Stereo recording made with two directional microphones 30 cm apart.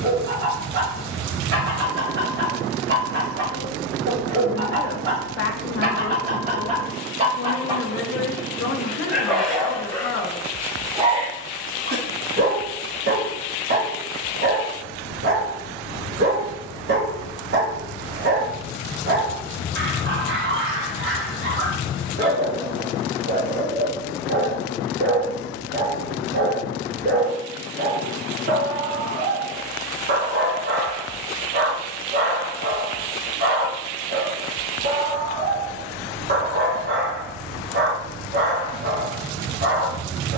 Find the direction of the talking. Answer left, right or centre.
left.